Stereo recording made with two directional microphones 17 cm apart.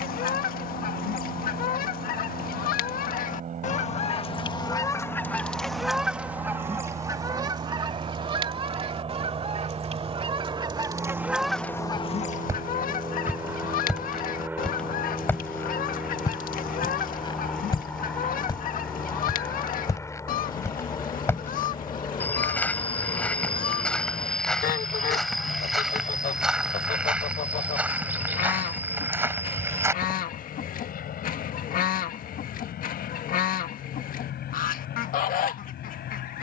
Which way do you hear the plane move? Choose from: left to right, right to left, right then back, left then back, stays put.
right to left.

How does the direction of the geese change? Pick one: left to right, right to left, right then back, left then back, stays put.
right then back.